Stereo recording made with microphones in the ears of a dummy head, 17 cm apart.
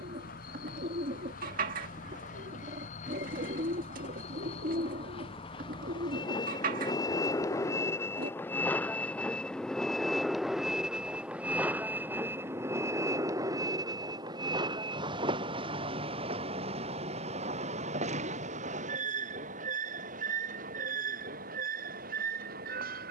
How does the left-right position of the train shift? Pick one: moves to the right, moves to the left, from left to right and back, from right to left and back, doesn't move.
moves to the right.